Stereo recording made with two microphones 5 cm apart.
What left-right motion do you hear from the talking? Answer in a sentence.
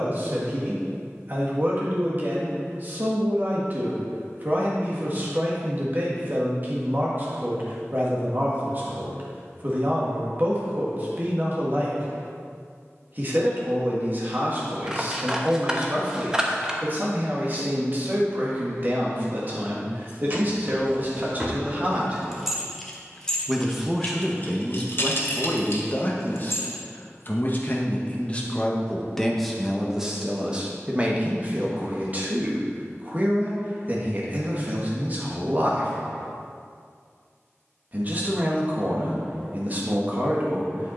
In this clip you hear the talking go left and come back.